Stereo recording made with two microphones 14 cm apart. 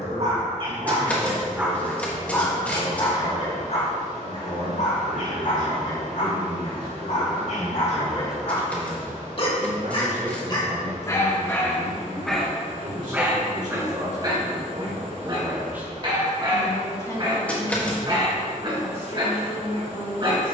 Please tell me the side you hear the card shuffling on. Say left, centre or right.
centre.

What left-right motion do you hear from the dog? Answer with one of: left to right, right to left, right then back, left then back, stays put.
left then back.